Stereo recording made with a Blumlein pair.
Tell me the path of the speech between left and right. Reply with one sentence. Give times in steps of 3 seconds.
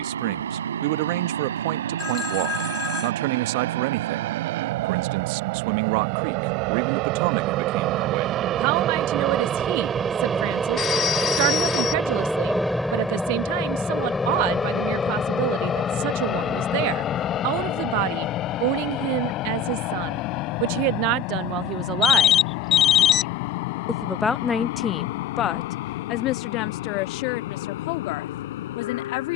You can hear the speech on the right from 0 s and on the left from 24 s.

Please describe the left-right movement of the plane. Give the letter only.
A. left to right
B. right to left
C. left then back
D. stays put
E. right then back
B.